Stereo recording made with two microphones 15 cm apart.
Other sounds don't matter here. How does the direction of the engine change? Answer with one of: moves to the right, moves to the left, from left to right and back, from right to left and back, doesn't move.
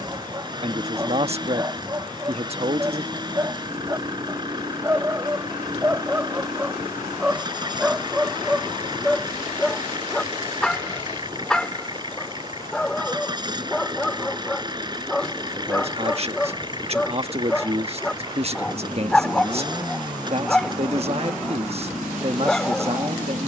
doesn't move.